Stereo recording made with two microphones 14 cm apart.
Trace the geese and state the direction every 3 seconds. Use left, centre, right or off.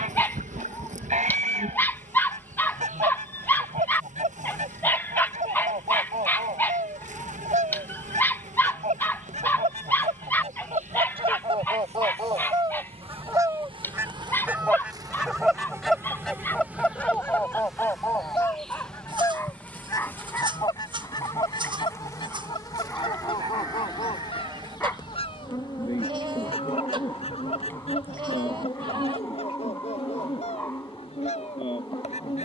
right, right, right, right, right, centre, left, left, left, left, left.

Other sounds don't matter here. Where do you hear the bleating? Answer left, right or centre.
right.